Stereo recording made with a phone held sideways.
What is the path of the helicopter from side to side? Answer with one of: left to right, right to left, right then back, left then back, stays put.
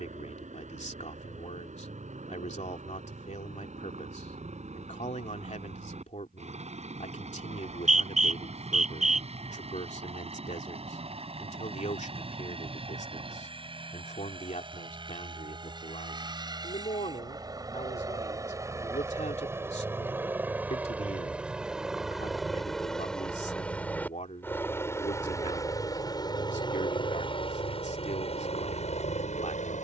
right to left.